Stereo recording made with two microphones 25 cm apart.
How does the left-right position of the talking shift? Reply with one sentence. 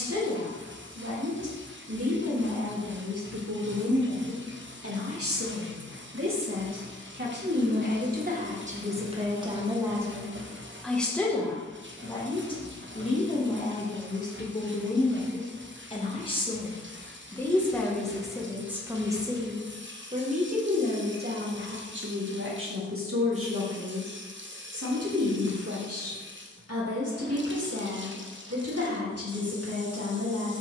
You can hear the talking move from right to left and back again.